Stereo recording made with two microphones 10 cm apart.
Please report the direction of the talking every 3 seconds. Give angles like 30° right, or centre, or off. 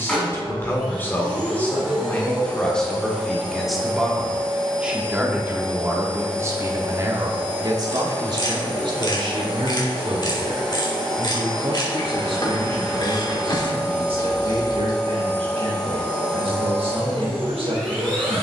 20° left, 10° right, 40° right, 60° right, 80° right, 80° right.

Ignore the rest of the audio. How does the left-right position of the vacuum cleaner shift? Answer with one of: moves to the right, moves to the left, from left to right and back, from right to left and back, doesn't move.
doesn't move.